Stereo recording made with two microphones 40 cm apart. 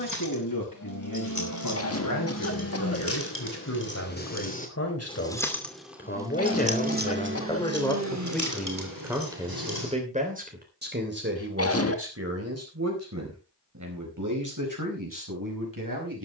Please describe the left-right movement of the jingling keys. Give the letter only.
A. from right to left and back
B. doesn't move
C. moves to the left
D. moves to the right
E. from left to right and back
D.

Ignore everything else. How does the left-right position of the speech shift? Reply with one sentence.
In this clip you hear the speech move to the right.